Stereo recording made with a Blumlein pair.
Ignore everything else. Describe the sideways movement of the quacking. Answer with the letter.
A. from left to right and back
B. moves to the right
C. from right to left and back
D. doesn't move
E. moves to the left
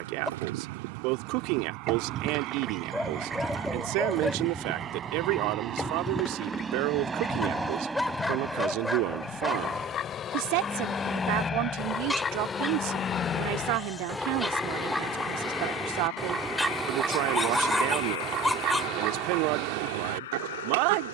C.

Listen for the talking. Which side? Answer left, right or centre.
right.